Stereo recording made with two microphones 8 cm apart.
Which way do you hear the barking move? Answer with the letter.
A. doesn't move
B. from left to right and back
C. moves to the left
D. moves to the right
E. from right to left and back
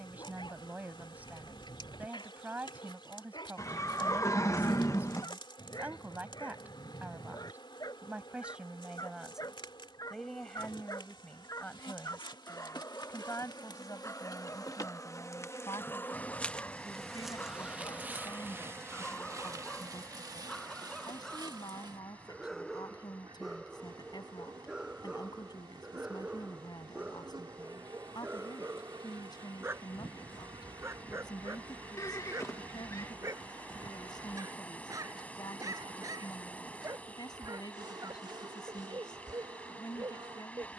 D.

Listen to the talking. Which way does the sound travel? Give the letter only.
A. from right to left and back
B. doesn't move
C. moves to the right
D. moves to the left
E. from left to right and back
D.